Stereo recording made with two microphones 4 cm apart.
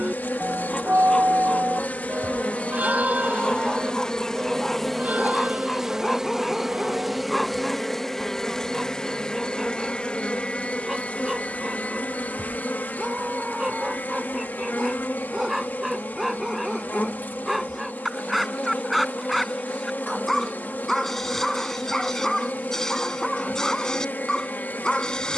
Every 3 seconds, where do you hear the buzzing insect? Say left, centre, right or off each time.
left, centre, centre, left, left, left, left, left, left.